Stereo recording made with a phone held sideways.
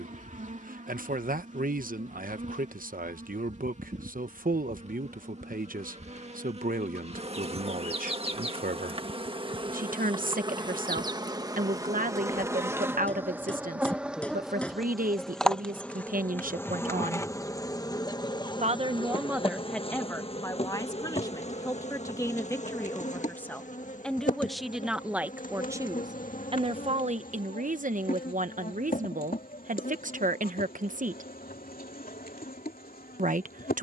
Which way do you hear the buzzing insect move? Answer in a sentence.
You can hear the buzzing insect move to the left.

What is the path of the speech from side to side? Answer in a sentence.
You can hear the speech go left and come back.